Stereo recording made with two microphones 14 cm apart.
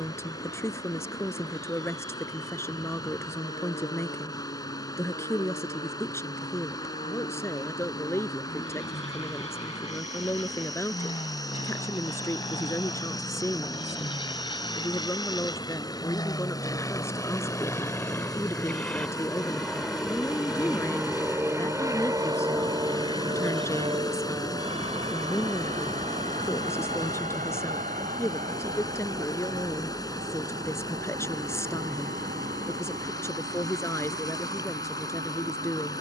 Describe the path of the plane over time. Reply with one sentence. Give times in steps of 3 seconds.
In this clip you hear the plane on the left from 0 s, in the centre from 18 s and on the right from 21 s.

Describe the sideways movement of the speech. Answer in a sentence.
You can hear the speech stay put.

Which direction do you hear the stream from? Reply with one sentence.
In this clip you hear the stream on the left.